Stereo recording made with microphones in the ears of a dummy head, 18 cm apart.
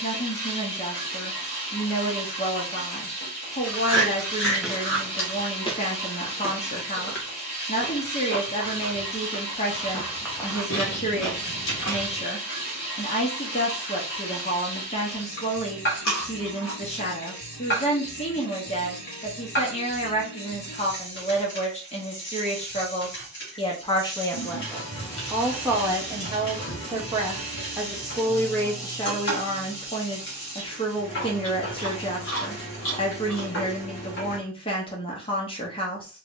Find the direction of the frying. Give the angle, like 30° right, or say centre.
60° left.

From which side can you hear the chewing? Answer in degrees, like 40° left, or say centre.
70° left.